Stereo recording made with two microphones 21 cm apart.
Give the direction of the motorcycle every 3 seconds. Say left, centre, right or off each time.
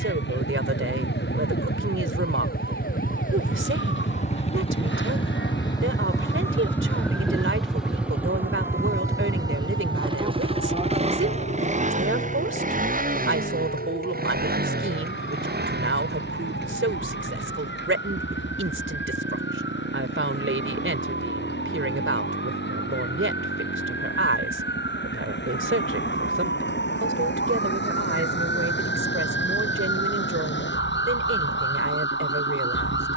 left, left, centre, right, right, right, right, right, right, right, right.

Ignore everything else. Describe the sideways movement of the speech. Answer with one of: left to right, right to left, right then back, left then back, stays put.
stays put.